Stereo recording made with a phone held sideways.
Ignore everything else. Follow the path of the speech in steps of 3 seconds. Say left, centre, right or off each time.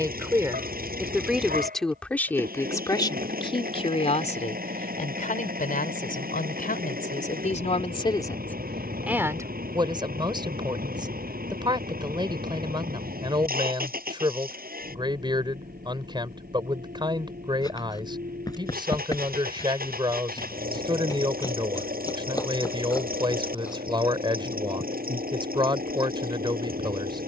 centre, left, left, right, right, right, right, right, right.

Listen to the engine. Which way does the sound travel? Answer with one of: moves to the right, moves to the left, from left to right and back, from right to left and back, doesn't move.
doesn't move.